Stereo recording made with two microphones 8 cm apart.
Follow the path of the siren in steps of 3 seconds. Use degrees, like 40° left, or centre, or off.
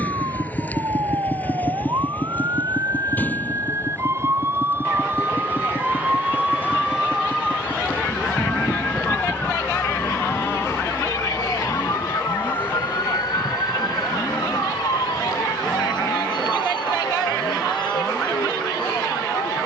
50° right, 30° right, centre, 30° left, 50° left, 60° left, 70° left.